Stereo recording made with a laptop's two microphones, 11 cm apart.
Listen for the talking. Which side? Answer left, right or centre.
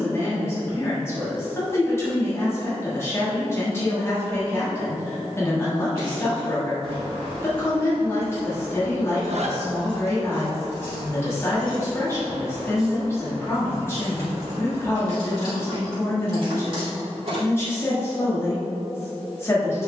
left.